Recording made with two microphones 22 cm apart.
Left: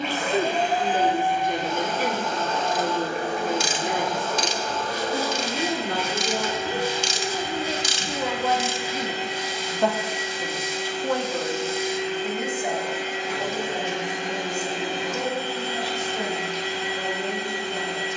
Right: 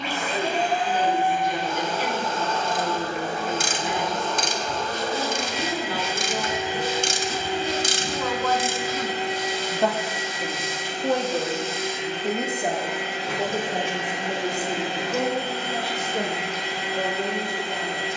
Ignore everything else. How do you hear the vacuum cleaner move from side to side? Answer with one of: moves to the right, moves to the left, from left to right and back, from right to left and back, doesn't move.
moves to the right.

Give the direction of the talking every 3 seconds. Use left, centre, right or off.
left, left, left, centre, right, right.